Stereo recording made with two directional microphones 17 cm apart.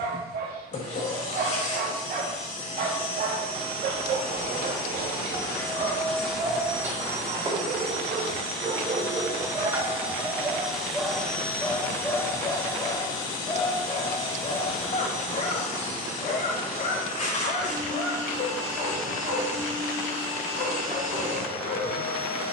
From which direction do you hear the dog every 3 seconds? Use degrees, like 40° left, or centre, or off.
60° right, 60° right, 50° right, 20° right, 30° left, 50° left, 60° left, 60° left.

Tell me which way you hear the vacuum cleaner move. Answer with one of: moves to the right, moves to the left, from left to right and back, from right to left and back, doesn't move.
from left to right and back.